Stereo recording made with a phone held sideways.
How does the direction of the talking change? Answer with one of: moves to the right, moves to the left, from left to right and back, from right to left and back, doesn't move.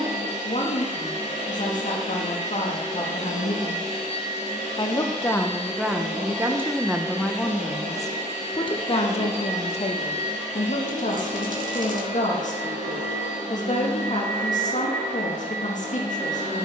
from left to right and back.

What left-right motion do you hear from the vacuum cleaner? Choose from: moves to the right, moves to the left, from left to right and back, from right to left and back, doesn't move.
doesn't move.